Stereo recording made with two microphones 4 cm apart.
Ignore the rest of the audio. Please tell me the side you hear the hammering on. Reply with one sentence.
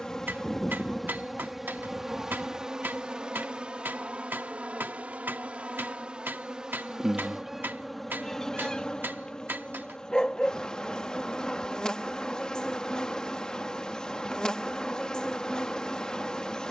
In this clip you hear the hammering on the right.